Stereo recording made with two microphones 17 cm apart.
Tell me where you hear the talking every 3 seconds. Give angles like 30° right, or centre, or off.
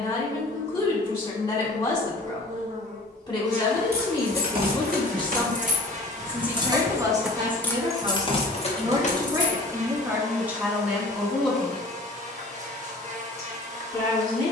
30° left, 20° left, 20° right, 10° right, 20° left.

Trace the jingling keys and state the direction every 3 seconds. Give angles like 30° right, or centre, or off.
off, 60° right, centre, 50° left, off.